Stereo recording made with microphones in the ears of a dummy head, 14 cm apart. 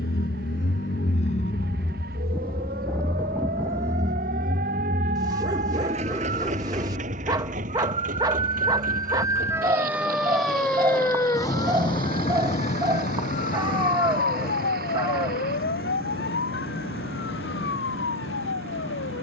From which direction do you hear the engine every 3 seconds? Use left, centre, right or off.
left, right, right, right, right, right, right.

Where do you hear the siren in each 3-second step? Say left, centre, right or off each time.
right, right, right, centre, left, left, left.